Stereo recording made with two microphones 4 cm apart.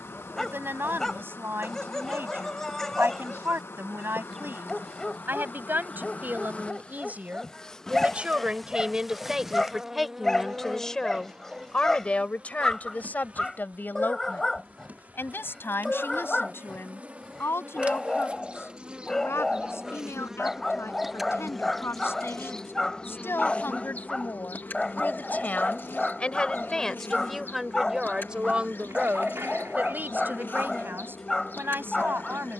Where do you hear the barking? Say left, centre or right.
centre.